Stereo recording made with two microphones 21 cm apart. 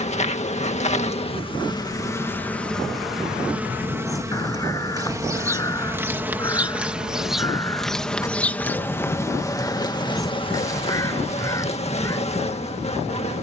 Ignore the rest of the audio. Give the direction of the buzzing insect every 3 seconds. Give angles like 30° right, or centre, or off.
20° left, 10° right, centre, 20° left, 30° left.